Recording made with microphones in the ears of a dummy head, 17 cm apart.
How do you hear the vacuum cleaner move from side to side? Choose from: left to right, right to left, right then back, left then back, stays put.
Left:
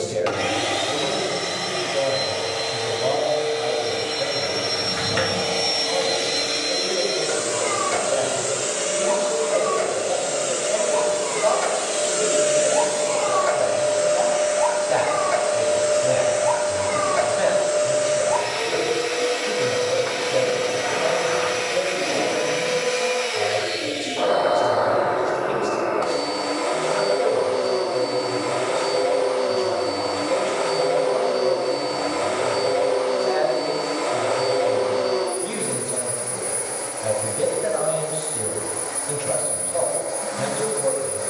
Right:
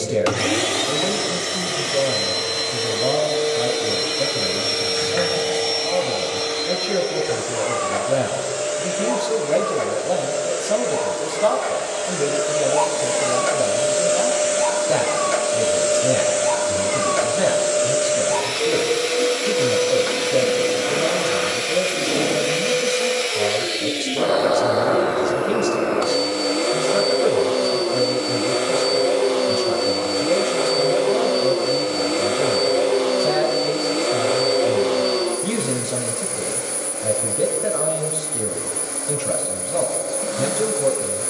left then back.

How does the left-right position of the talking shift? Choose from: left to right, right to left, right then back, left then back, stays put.
stays put.